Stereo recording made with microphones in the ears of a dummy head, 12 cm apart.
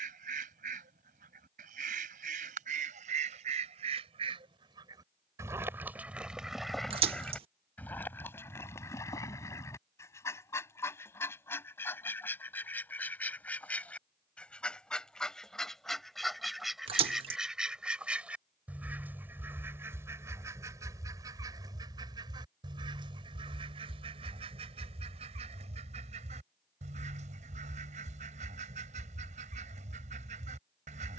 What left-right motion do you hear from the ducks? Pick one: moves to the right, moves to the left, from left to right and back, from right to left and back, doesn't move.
from right to left and back.